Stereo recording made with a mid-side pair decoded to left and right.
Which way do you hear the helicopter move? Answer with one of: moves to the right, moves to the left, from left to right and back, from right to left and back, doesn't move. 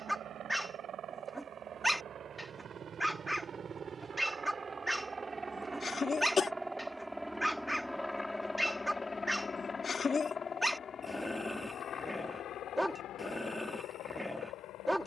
moves to the left.